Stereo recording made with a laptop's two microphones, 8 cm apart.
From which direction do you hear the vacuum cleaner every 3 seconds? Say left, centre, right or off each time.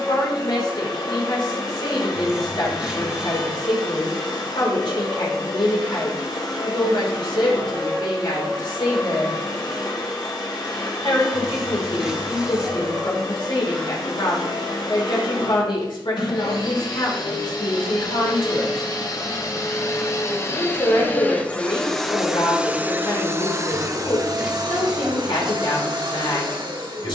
left, left, left, left, left, left, left, centre, right.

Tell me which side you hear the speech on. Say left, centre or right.
left.